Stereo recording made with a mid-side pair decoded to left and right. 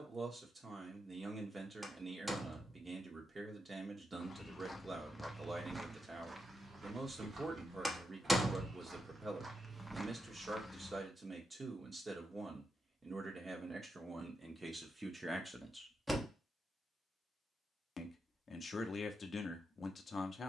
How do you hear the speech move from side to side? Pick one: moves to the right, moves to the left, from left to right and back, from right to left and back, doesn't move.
moves to the left.